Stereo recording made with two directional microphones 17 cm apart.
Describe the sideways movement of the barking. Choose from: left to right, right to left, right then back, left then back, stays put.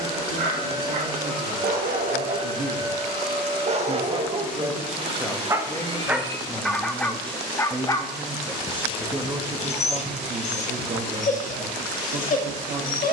right to left.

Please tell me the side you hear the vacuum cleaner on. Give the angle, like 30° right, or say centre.
40° right.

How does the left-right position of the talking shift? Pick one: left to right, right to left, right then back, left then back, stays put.
left then back.